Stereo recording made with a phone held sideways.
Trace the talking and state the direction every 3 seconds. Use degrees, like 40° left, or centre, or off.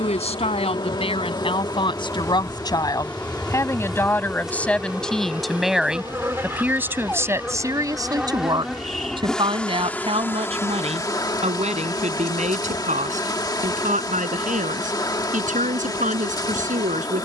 30° left, 10° left, 20° right, 40° right, 50° right, 50° right.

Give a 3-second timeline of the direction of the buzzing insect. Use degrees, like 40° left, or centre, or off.
20° left, centre, 10° right, 20° left, 20° left, 20° left.